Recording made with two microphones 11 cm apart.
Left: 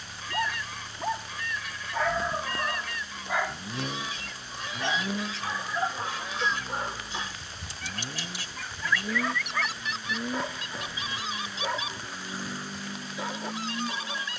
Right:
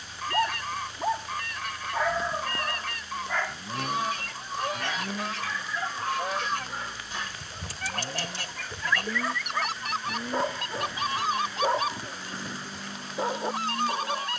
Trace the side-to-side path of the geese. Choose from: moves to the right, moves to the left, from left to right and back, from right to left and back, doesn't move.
doesn't move.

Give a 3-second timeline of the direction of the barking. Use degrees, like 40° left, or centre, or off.
10° right, 20° left, 20° left, 30° right, 30° right.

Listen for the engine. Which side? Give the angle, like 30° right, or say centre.
10° left.